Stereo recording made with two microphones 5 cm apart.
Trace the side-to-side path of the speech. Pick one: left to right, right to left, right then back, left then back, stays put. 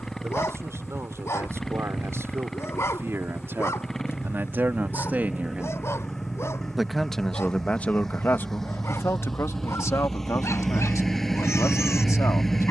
right to left.